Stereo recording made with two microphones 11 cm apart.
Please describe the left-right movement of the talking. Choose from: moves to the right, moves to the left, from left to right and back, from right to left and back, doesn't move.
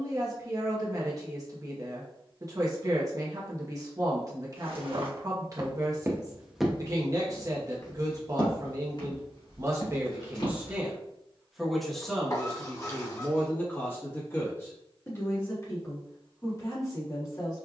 moves to the left.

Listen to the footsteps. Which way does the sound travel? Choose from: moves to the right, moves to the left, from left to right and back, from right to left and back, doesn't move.
moves to the left.